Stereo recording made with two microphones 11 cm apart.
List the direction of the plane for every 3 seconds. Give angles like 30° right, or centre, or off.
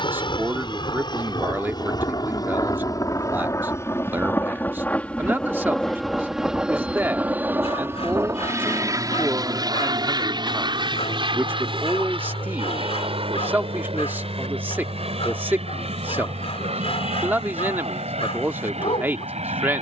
50° left, 20° left, 20° right, 40° right, 60° right, 60° right, 70° right.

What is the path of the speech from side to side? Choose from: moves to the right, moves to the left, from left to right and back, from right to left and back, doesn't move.
doesn't move.